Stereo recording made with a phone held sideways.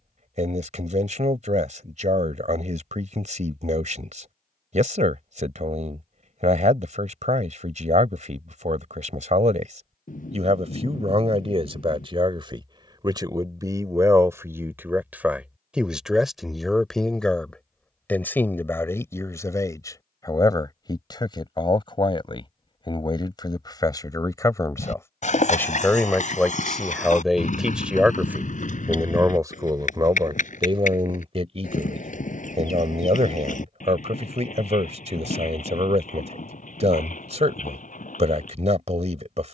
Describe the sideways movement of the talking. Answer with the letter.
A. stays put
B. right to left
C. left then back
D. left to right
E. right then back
C.